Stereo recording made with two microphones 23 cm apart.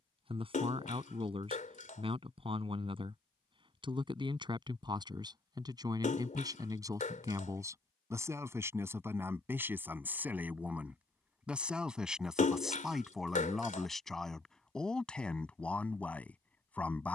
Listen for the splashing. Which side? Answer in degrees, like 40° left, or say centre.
30° left.